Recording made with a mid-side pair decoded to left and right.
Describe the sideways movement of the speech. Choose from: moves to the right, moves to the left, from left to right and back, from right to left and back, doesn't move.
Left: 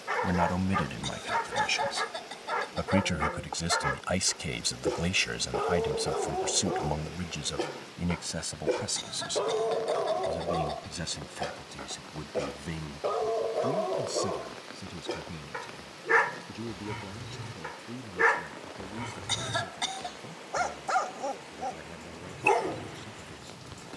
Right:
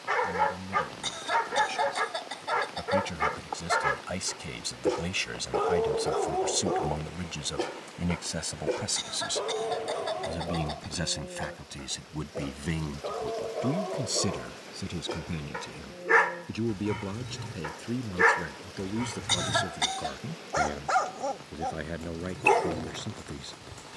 moves to the right.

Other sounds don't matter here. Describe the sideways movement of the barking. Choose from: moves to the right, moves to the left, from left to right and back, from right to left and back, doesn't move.
from right to left and back.